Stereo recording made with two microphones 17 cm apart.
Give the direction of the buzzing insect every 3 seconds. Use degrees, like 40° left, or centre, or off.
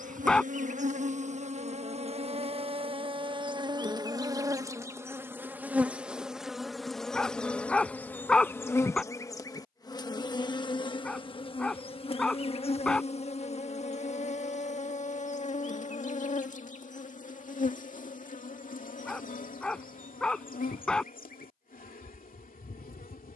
40° right, 20° right, 10° left, 30° left, 40° left, 50° left, 50° left, 60° left.